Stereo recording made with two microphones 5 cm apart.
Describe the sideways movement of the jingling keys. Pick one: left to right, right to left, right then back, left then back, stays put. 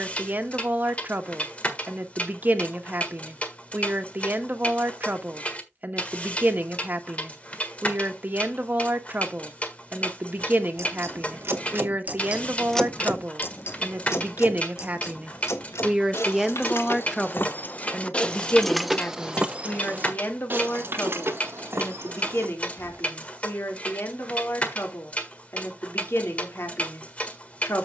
left then back.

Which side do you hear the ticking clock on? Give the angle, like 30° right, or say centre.
30° left.